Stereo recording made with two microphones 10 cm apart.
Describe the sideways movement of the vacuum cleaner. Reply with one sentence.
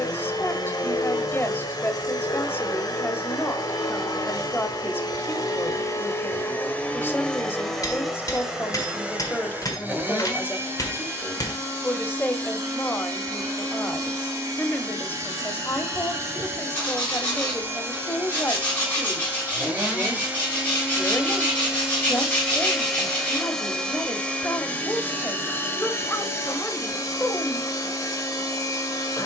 You can hear the vacuum cleaner move from left to right and back again.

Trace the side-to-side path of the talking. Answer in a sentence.
You can hear the talking stay in one place.